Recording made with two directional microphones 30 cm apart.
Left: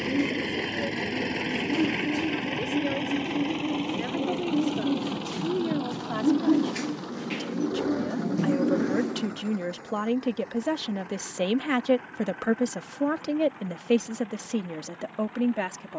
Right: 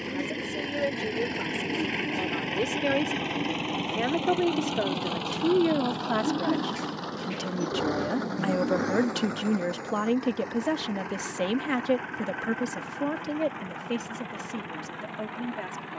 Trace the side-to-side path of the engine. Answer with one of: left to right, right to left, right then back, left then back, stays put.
left to right.